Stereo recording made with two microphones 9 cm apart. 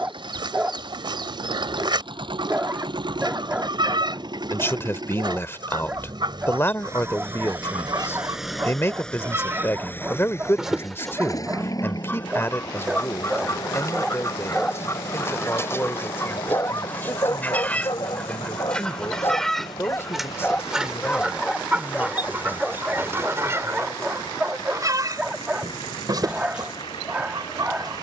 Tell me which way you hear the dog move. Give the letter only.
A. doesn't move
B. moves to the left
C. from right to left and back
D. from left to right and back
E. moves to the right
C.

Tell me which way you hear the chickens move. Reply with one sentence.
You can hear the chickens move from right to left and back again.